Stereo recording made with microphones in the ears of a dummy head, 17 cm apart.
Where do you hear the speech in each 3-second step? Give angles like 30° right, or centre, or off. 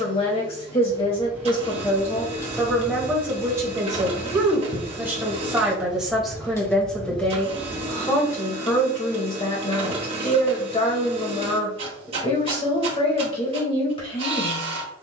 20° left, 10° right, 10° left, 30° left, 30° left.